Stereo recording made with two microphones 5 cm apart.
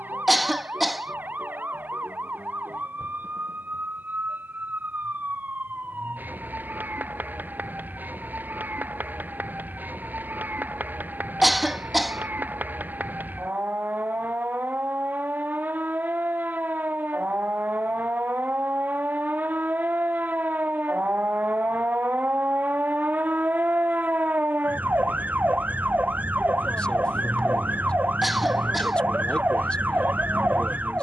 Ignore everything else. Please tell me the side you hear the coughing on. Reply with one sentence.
You can hear the coughing in the centre.